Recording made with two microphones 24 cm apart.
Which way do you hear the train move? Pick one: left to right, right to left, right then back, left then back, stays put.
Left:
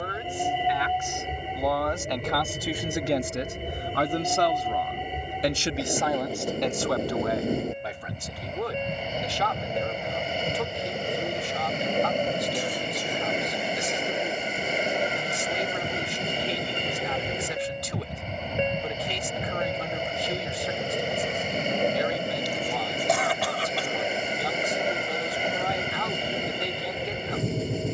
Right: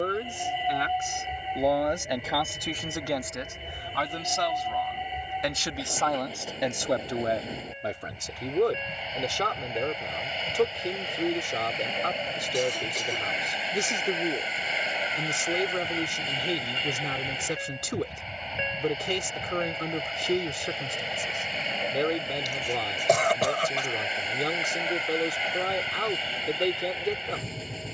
stays put.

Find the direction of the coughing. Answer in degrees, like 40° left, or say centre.
50° right.